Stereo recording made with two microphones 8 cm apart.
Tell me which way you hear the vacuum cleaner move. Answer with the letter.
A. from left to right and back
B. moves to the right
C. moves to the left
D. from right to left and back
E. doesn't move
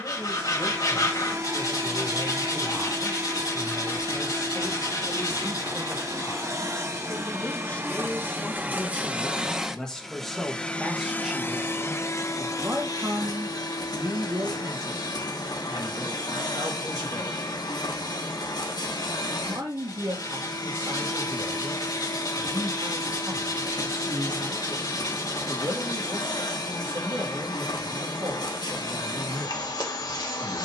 C.